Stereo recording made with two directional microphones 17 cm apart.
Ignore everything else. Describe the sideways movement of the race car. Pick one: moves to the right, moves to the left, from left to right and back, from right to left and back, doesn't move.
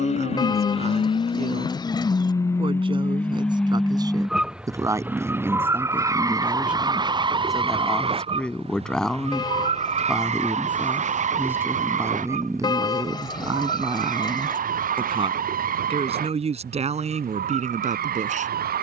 moves to the right.